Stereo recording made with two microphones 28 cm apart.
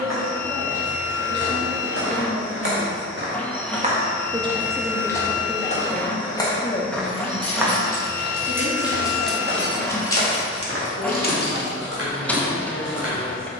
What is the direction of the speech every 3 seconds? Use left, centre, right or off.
right, centre, left, left, left.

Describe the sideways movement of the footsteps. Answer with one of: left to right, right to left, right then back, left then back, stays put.
left then back.